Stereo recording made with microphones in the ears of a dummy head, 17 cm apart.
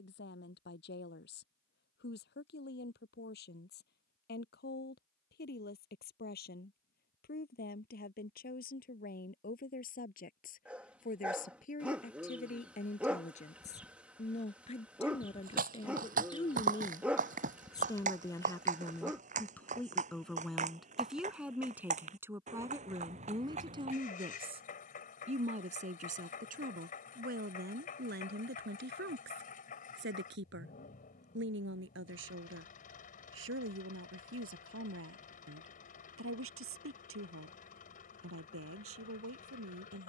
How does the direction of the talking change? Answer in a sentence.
In this clip you hear the talking travel towards the right.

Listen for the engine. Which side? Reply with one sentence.
You can hear the engine on the left.